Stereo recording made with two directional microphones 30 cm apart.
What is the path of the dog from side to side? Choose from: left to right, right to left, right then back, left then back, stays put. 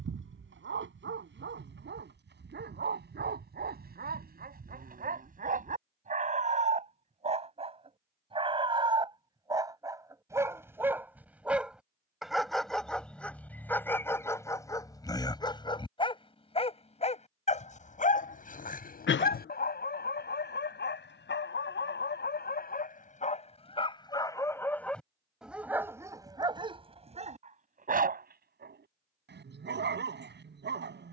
left then back.